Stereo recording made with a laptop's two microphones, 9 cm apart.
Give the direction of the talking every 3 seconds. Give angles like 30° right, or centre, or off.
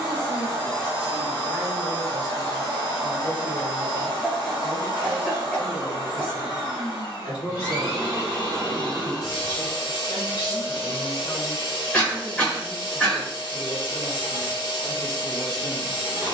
10° right, 50° left, 70° left, 50° left, 20° left, 10° right.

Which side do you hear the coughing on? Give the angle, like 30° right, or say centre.
10° left.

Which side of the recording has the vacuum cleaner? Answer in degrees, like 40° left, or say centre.
40° left.